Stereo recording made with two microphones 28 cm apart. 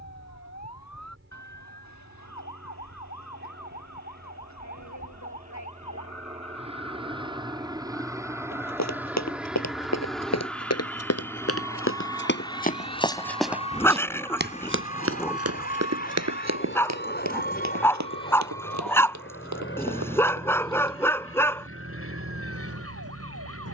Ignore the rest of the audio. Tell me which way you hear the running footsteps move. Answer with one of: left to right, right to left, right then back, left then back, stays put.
left to right.